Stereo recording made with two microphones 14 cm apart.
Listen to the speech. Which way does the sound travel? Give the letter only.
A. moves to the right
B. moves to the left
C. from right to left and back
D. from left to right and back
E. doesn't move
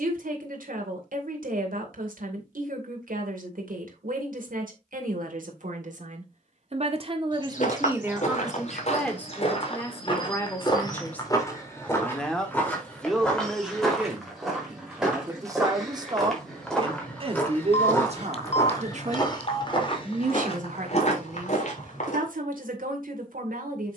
C.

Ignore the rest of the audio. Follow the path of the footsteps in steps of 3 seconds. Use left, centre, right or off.
off, off, left, left, centre, centre, left, left.